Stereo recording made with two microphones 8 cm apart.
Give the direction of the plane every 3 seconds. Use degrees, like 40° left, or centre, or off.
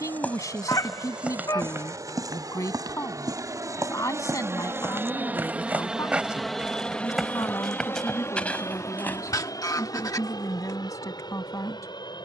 70° right, 40° right, 20° left, 60° left.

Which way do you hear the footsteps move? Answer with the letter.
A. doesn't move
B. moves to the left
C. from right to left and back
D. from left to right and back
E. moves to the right
D.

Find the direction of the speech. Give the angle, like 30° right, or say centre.
50° left.